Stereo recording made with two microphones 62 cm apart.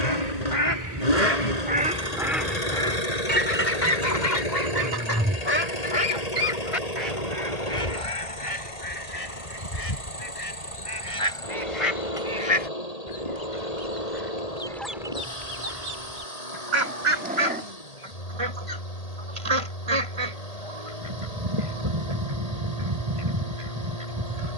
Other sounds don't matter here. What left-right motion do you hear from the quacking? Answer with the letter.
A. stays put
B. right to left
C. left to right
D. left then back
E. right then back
D.